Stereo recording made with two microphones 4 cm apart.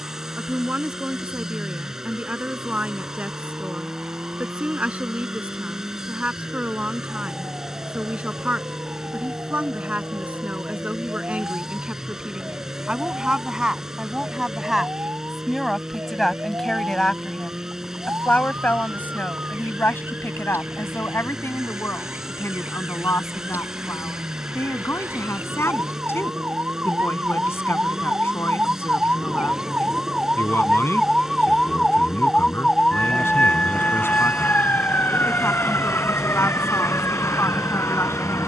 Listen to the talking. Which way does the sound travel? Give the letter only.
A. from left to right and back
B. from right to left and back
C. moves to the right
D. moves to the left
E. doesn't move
D.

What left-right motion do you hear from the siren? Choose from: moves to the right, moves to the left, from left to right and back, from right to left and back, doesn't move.
moves to the left.